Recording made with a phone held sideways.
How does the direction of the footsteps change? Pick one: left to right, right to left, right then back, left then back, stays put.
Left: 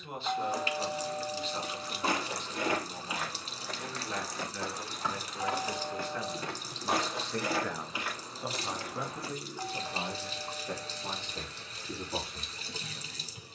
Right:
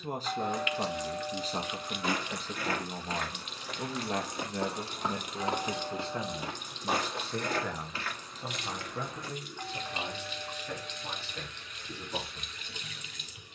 right then back.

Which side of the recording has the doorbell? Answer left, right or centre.
centre.